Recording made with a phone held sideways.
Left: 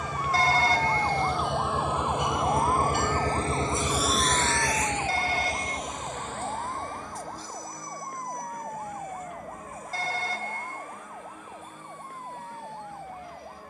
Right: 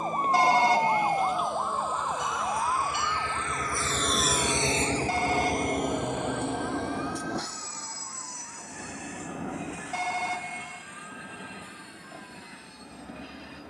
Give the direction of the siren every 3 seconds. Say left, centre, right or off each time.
centre, left, left, left, left.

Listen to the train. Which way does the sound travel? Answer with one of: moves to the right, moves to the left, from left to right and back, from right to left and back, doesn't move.
moves to the right.